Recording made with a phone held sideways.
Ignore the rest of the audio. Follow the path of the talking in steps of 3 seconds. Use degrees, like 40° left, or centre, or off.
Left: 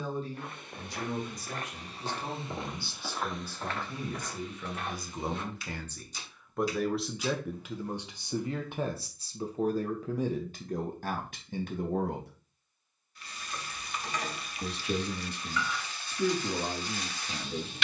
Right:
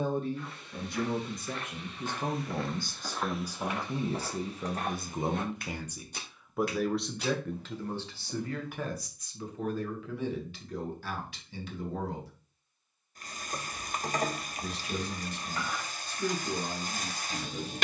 50° right, 30° right, 10° left, 40° left, 60° left, 70° left.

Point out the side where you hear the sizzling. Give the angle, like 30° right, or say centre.
40° right.